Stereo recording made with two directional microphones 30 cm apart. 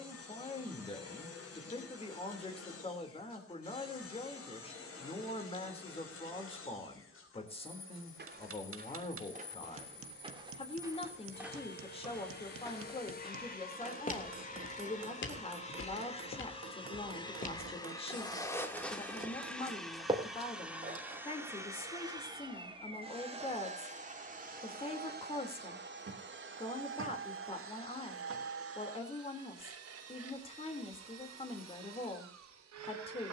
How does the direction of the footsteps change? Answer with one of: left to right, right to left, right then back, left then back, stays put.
left then back.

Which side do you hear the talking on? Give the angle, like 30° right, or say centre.
20° left.